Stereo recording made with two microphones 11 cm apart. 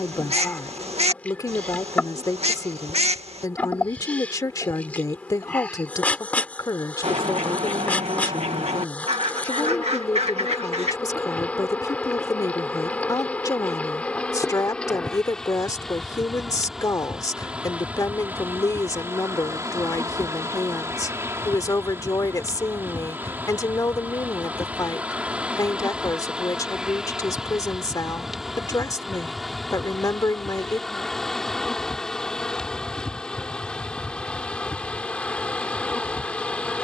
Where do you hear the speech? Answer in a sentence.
In this clip you hear the speech on the left.